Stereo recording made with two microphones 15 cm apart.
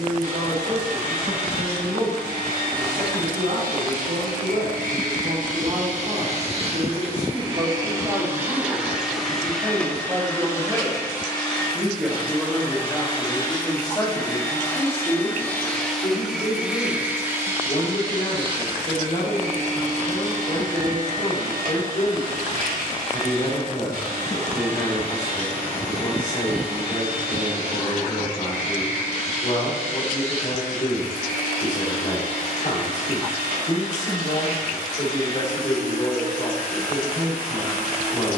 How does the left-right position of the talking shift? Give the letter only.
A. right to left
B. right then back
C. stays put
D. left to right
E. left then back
A.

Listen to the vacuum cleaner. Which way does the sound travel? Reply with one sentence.
In this clip you hear the vacuum cleaner move from right to left and back again.